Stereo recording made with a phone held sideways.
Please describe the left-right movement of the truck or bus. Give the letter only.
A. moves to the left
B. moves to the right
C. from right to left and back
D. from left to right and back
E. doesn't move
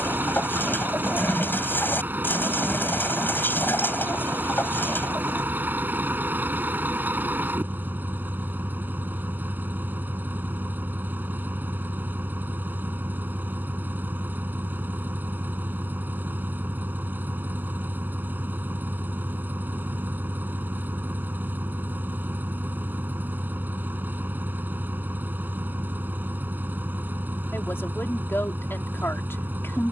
E.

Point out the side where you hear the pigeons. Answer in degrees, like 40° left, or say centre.
10° left.